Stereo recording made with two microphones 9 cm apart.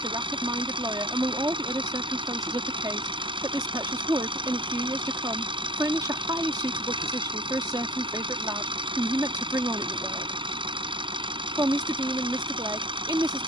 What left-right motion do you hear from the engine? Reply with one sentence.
You can hear the engine stay put.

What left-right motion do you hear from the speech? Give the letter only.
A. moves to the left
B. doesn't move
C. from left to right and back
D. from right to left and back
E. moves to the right
B.